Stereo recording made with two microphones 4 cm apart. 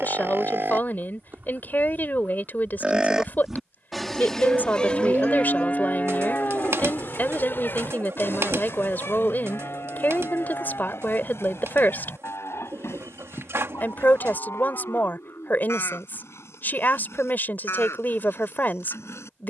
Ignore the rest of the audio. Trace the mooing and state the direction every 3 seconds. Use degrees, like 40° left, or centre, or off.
40° right, 10° left, 50° left, 60° left, 70° left, 70° left, 80° left.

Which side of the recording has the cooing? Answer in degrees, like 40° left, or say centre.
70° right.